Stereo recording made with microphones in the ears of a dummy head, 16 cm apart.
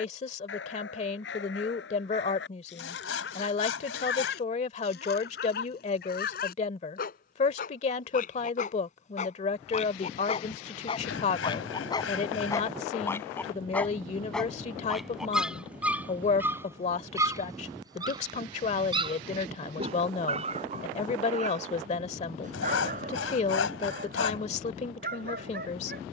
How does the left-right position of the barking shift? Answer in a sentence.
You can hear the barking move from left to right.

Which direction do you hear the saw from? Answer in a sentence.
In this clip you hear the saw on the left.